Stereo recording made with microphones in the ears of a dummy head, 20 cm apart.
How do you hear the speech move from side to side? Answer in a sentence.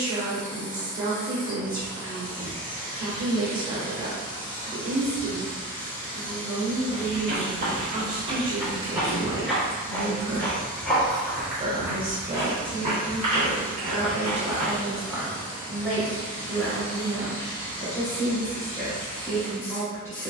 In this clip you hear the speech travel towards the left.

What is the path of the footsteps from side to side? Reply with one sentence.
You can hear the footsteps move from right to left and back again.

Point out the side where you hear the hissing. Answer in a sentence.
In this clip you hear the hissing on the left.